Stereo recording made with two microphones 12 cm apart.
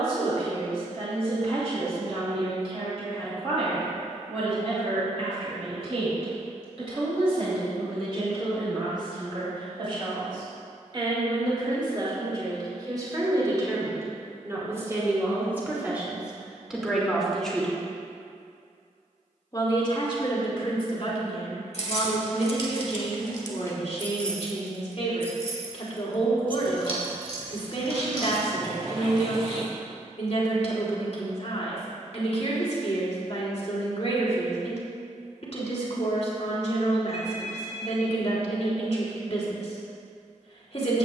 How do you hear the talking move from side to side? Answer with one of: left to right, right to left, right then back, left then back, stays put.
right to left.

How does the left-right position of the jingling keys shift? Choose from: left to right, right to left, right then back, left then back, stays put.
left to right.